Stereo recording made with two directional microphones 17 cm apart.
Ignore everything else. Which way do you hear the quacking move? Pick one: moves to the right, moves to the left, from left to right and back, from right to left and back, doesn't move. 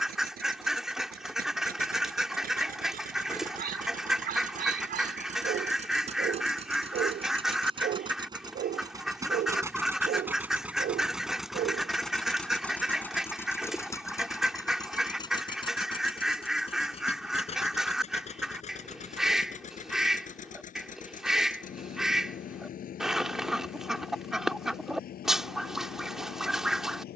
doesn't move.